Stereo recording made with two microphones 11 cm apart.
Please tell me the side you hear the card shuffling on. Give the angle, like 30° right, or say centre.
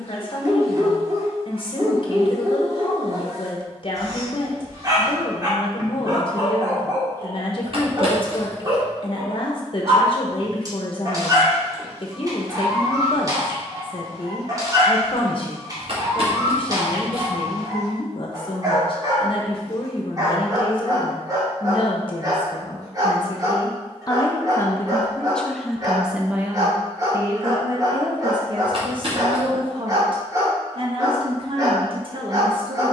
50° right.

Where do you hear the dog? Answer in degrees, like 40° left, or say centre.
30° right.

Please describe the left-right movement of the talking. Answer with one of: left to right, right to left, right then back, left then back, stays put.
left to right.